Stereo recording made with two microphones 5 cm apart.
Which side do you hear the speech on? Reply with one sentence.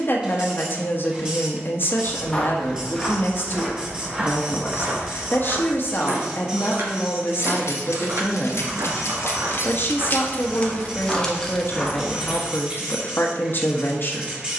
You can hear the speech on the left.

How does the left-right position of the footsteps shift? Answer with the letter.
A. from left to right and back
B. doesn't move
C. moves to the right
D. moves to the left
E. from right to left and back
A.